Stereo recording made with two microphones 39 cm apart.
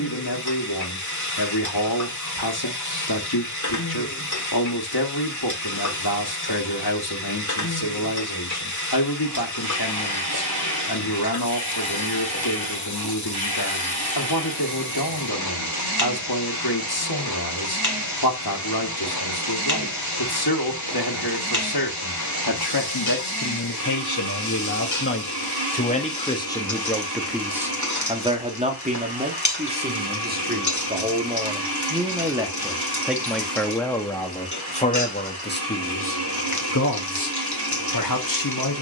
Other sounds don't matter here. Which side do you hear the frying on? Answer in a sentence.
You can hear the frying on the left.